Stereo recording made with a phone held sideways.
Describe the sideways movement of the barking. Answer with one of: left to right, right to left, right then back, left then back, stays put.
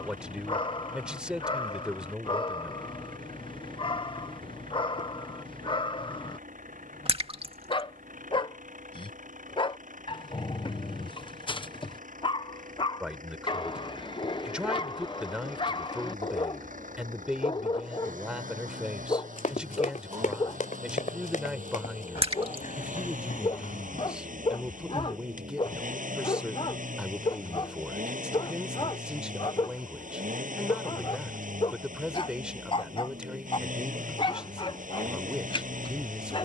stays put.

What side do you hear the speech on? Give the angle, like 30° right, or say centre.
10° right.